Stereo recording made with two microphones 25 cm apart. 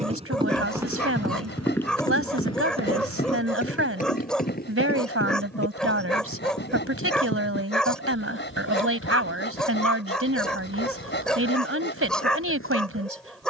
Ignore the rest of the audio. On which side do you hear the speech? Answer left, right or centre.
right.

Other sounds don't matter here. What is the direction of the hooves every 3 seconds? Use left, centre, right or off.
centre, left, left, left, left.